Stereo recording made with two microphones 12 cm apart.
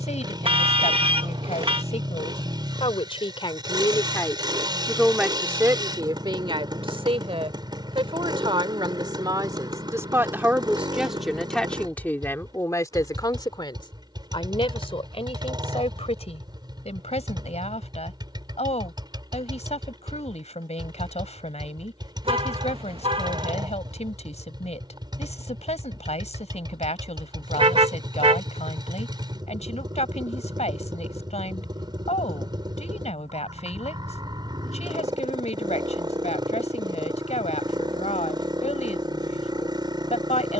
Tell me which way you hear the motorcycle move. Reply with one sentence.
You can hear the motorcycle stay in one place.